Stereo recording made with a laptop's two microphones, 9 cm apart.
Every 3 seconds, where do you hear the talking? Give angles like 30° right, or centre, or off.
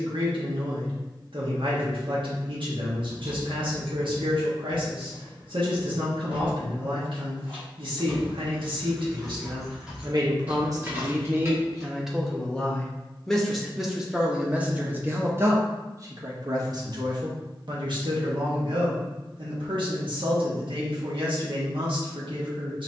70° right, 70° right, 70° right, 40° right, 10° right, 40° right, 70° right, 70° right.